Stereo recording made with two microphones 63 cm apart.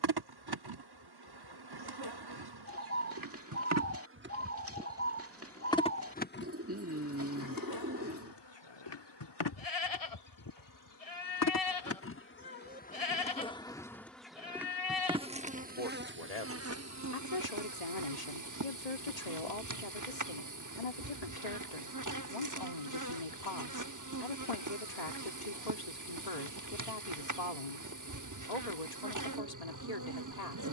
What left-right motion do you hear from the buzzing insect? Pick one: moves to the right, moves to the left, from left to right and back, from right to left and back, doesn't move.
from right to left and back.